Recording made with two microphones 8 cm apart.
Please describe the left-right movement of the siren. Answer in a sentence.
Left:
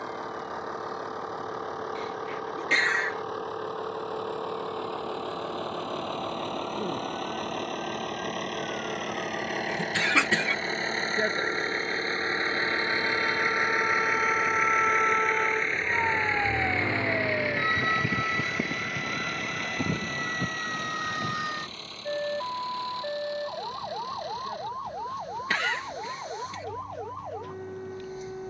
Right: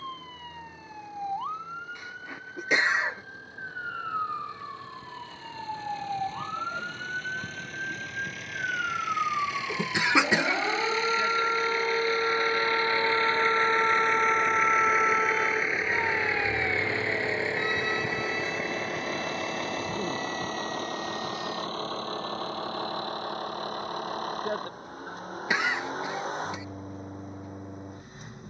In this clip you hear the siren go from the right side to the left.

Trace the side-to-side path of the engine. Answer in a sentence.
In this clip you hear the engine travel towards the right.